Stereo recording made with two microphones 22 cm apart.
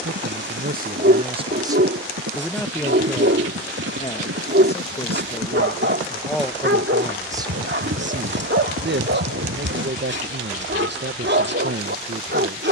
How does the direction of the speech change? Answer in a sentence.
You can hear the speech go left and come back.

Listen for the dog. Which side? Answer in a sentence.
In this clip you hear the dog on the right.